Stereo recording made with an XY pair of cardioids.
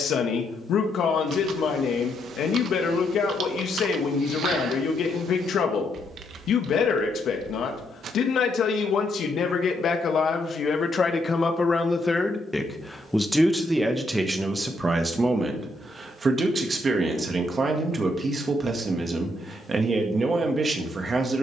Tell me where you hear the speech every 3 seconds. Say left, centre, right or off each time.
left, left, left, left, centre, right, right.